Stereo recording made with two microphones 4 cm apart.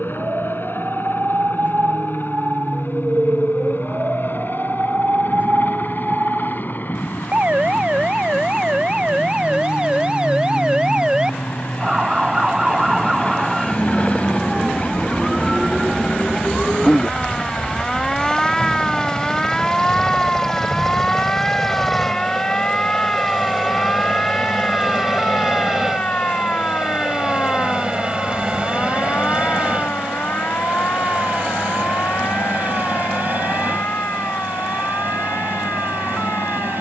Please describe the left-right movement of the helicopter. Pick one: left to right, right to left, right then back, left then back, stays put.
left to right.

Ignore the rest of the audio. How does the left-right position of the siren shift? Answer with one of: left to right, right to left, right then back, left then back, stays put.
right to left.